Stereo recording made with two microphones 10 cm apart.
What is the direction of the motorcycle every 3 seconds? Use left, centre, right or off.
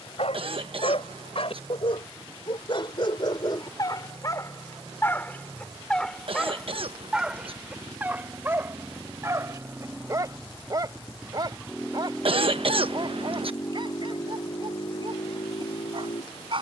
right, right, right, centre, left, left.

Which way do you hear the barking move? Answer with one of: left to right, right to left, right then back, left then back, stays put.
left to right.